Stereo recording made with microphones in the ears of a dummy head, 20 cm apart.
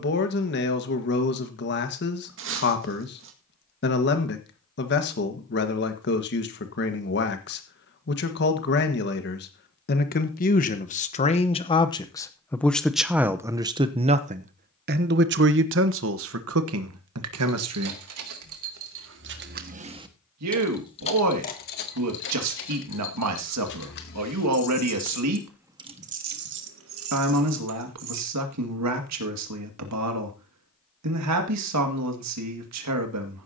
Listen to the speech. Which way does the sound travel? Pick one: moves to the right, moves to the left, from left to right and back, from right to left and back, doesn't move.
moves to the right.